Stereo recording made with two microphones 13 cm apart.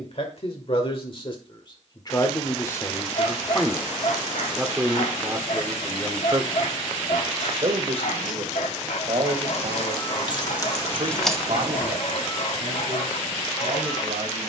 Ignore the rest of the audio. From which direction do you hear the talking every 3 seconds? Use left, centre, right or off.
left, centre, right, right, right.